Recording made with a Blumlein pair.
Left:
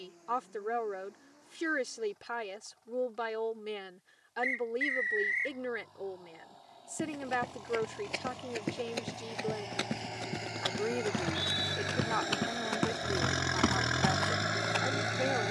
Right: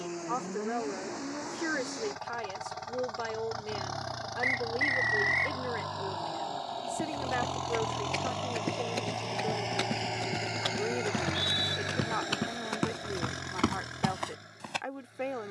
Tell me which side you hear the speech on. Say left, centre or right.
centre.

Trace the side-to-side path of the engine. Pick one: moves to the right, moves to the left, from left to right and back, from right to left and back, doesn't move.
moves to the left.